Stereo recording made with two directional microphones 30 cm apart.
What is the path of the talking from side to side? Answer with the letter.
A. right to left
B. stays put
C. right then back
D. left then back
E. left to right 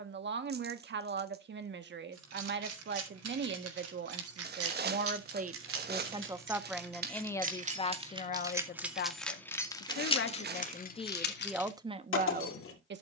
D.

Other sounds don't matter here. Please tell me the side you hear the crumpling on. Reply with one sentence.
You can hear the crumpling on the right.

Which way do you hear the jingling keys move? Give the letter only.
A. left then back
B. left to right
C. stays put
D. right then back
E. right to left
E.